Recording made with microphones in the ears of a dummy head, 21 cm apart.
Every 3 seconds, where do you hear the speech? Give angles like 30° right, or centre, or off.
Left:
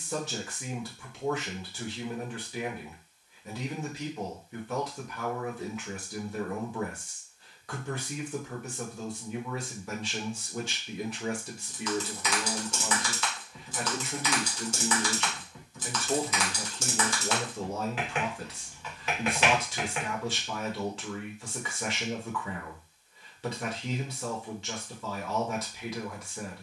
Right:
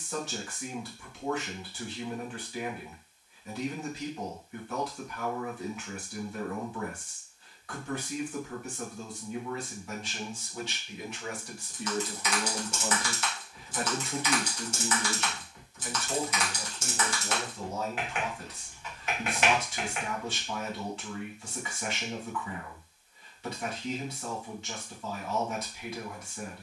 60° left, 60° left, 60° left, 40° left, centre, 30° left, 60° left, 60° left, 60° left.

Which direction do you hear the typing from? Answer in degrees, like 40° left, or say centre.
70° left.